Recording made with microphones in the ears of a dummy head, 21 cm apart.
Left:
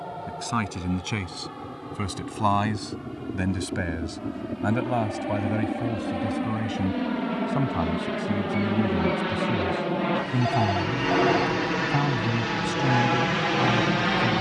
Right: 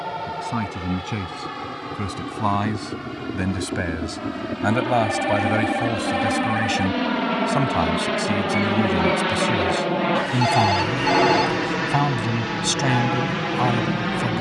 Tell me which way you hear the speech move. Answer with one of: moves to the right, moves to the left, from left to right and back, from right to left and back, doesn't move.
moves to the right.